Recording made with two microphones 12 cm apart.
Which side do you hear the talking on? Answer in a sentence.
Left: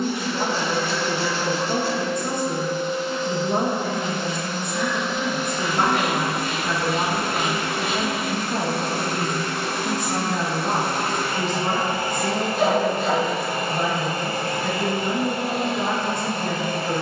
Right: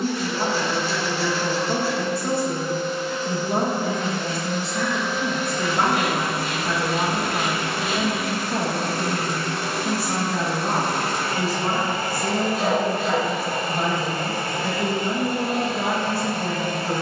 In this clip you hear the talking in the centre.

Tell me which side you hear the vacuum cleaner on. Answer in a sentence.
In this clip you hear the vacuum cleaner on the left.